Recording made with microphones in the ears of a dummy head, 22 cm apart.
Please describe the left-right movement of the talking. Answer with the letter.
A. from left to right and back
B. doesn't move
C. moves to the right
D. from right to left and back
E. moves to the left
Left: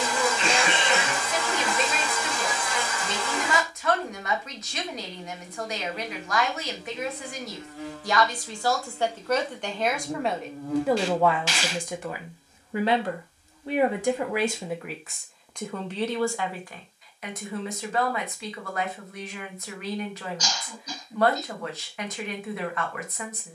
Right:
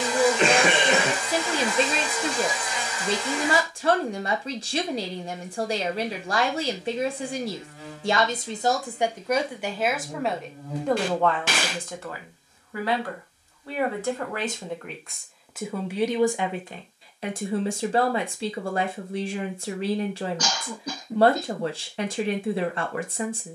D.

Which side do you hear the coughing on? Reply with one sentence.
You can hear the coughing on the right.